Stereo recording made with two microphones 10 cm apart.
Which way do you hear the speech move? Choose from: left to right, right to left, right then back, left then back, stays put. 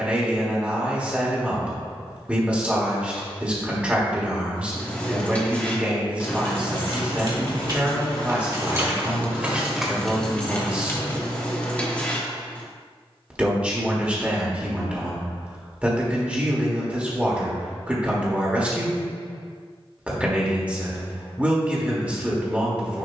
stays put.